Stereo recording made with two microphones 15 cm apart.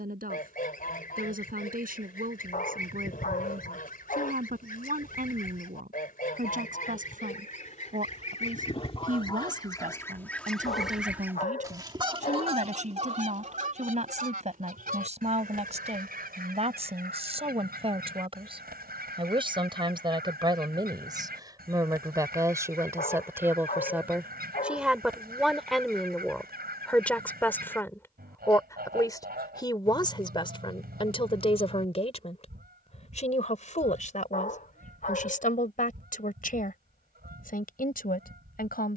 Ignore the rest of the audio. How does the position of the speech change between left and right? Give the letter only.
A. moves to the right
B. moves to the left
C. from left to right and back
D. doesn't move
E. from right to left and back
B.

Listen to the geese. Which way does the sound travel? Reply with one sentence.
In this clip you hear the geese move from left to right.